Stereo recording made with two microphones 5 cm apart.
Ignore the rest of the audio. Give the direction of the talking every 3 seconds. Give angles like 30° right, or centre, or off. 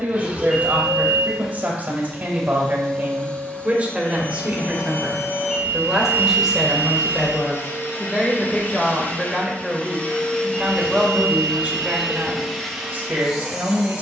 30° right, 20° right, 10° left, 10° right, 30° right.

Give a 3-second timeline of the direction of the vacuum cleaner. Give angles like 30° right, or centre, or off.
centre, 40° left, 50° left, 20° left, centre.